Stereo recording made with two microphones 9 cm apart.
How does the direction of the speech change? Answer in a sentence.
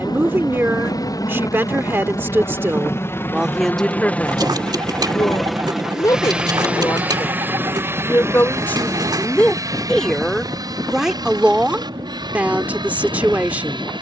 In this clip you hear the speech move from right to left and back again.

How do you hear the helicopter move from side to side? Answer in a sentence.
You can hear the helicopter travel towards the right.